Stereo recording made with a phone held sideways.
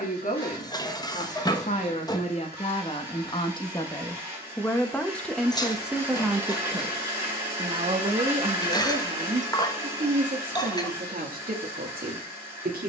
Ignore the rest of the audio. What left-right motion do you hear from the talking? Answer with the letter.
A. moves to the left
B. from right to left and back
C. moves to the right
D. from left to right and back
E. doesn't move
C.